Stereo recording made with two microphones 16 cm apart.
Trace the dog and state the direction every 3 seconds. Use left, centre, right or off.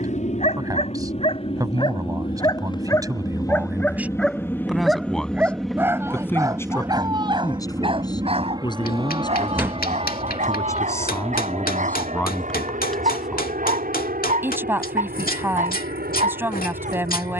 left, centre, right, right, right, right.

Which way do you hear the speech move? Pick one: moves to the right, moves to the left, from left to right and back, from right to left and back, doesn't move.
from right to left and back.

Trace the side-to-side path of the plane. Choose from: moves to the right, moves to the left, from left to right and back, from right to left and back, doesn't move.
moves to the right.